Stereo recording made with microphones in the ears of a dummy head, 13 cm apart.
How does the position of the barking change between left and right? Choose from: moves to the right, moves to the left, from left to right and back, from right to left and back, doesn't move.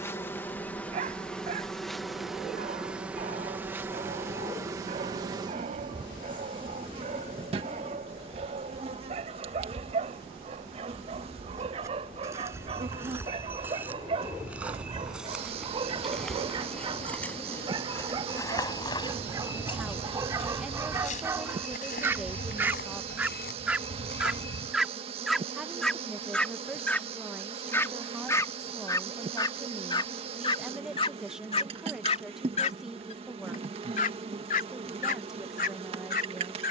moves to the left.